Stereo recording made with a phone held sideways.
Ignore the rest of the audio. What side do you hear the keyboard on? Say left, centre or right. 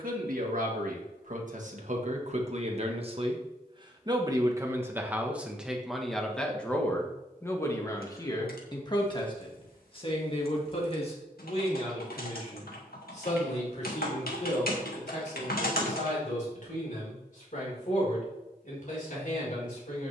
left.